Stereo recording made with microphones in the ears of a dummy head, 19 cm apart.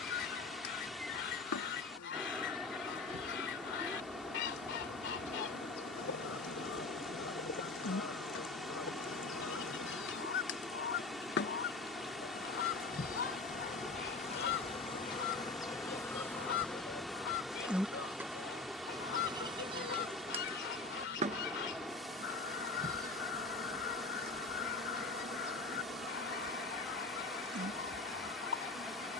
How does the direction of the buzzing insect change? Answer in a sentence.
You can hear the buzzing insect move to the right.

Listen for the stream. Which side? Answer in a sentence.
You can hear the stream in the centre.